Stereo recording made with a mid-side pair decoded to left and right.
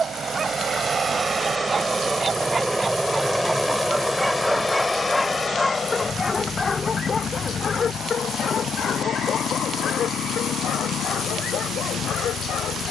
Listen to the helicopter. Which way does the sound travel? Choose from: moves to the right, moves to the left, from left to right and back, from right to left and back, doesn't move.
moves to the left.